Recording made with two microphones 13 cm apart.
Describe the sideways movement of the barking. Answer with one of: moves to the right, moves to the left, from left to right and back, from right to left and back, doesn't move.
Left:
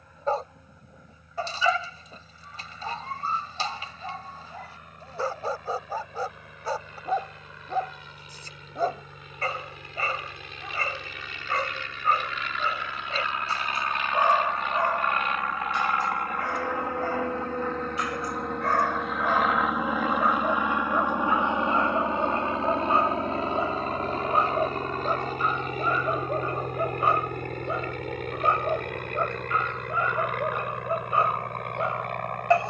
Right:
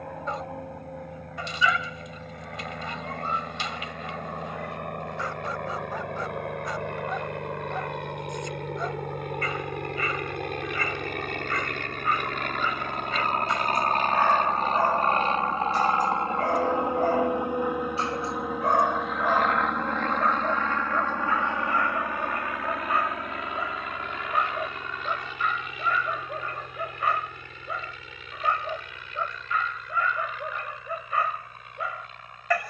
from left to right and back.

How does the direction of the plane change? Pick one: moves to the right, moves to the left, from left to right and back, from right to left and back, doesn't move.
moves to the left.